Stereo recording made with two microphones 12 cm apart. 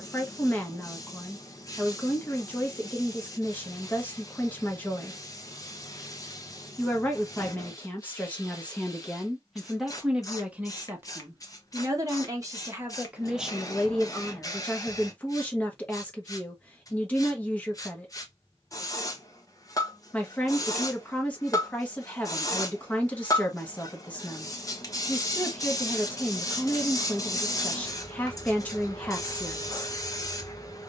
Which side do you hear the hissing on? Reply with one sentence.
In this clip you hear the hissing on the left.